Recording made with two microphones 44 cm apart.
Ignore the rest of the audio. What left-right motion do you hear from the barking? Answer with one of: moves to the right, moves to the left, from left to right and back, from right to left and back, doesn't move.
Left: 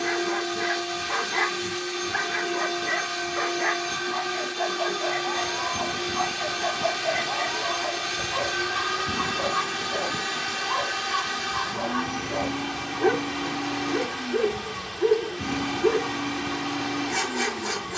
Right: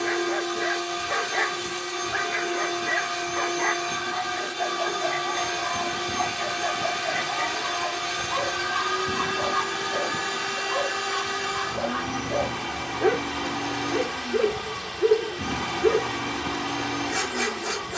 from left to right and back.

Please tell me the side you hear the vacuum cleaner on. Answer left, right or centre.
right.